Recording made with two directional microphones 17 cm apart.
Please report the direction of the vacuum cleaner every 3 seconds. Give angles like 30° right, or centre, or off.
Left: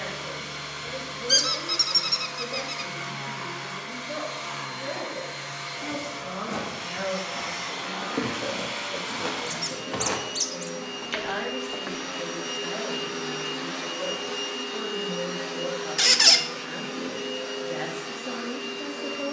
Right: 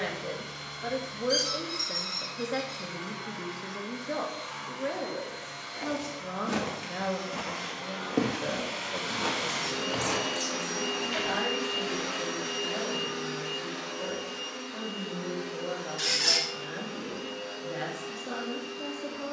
60° left, 60° left, 50° left, 20° right, 20° left, 60° left, 60° left.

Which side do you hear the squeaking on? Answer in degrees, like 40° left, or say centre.
60° left.